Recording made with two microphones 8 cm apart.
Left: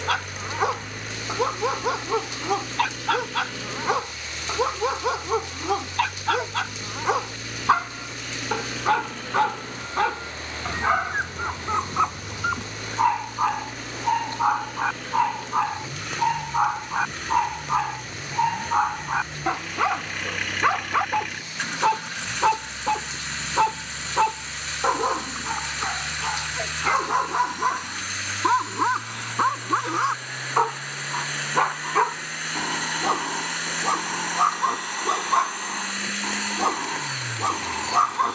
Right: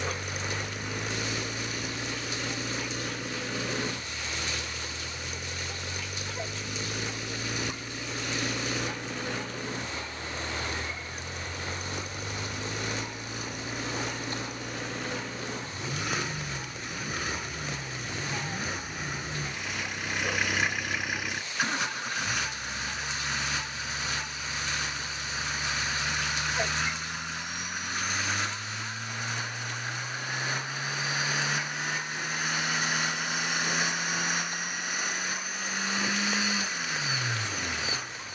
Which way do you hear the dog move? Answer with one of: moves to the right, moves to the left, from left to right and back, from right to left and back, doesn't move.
doesn't move.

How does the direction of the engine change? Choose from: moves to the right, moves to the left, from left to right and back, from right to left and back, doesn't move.
doesn't move.